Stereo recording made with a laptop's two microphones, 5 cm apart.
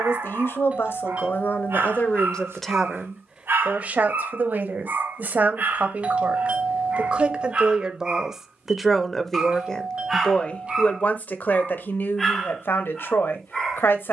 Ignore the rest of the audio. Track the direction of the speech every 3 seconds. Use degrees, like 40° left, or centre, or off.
40° left, 40° right, 20° right, 30° left, 50° left.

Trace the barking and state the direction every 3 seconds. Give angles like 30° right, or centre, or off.
60° right, 50° right, 30° right, centre, 10° left.